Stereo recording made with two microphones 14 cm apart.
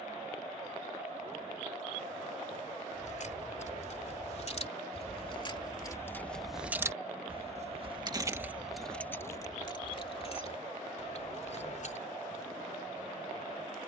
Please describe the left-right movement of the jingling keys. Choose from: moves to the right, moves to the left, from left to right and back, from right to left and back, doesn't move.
from left to right and back.